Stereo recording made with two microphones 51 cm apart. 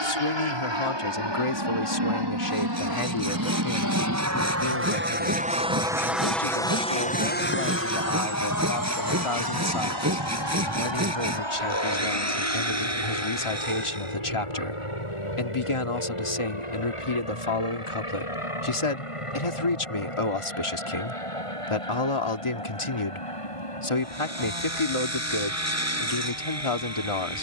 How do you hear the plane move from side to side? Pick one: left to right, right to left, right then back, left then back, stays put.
right to left.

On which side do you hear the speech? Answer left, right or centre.
left.